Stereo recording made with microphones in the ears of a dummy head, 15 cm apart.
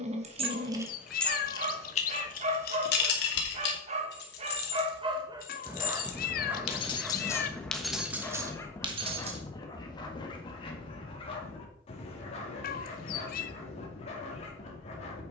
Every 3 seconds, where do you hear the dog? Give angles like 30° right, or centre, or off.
40° right, 30° right, centre, 30° left, 40° left.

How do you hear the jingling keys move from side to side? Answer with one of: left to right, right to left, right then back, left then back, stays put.
left then back.